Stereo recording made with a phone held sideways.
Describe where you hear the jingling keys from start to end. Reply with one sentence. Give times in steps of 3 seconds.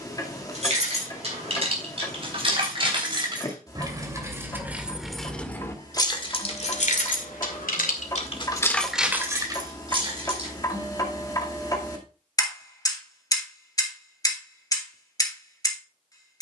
In this clip you hear the jingling keys on the right from 0 s, in the centre from 3 s, on the left from 6 s, on the right from 9 s and not at all from 12 s.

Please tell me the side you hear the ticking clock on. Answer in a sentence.
You can hear the ticking clock on the left.